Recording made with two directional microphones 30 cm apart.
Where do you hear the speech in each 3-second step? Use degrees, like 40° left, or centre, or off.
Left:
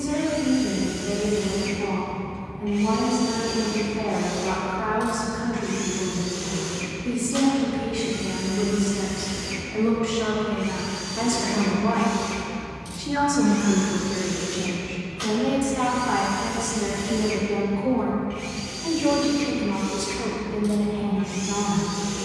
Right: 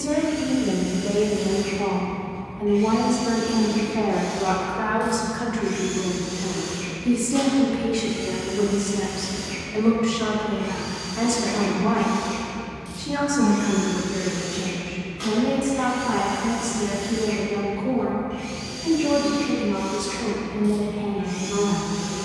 60° right, 40° right, 30° right, centre, 20° left, 30° left, 50° left, 50° left.